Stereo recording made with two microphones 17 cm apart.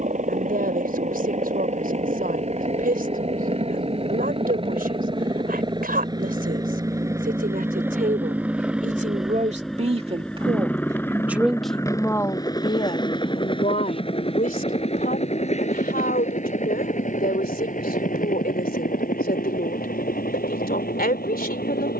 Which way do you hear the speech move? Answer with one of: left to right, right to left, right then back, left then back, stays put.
right to left.